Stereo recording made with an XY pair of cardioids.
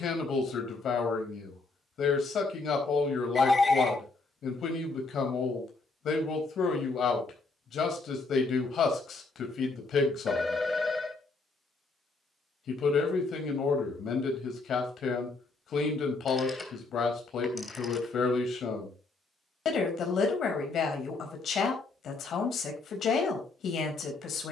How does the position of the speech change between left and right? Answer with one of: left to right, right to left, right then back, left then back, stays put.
stays put.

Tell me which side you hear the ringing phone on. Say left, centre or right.
left.